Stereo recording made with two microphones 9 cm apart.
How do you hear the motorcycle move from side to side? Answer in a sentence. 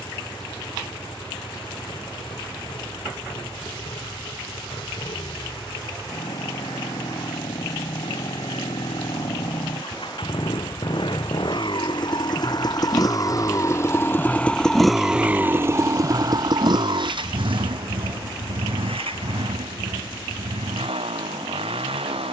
In this clip you hear the motorcycle move to the right.